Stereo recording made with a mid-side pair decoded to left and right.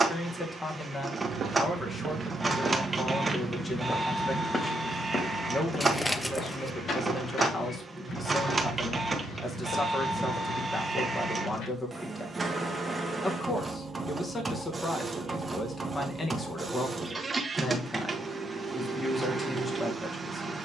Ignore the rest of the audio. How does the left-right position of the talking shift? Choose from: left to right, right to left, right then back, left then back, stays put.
stays put.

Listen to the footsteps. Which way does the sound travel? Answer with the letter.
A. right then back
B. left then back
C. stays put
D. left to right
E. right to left
E.